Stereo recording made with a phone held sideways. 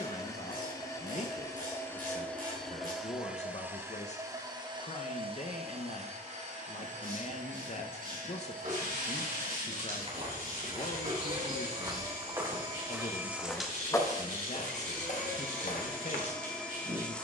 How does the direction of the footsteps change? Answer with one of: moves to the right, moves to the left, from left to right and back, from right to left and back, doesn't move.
moves to the left.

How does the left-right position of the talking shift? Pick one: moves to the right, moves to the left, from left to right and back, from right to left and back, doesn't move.
doesn't move.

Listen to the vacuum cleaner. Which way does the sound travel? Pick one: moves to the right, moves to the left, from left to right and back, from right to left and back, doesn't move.
from left to right and back.